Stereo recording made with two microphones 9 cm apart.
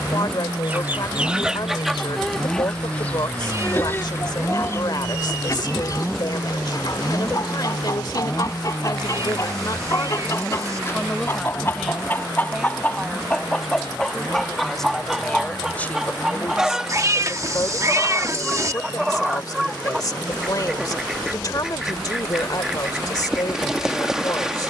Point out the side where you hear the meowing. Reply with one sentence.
You can hear the meowing on the right.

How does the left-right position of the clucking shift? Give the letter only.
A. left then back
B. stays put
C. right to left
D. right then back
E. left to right
A.